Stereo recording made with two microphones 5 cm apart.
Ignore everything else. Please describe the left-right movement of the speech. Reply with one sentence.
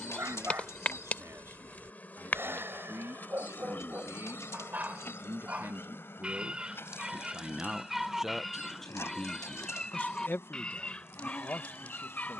You can hear the speech go from the right side to the left.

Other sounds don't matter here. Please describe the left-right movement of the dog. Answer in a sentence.
You can hear the dog go from the right side to the left.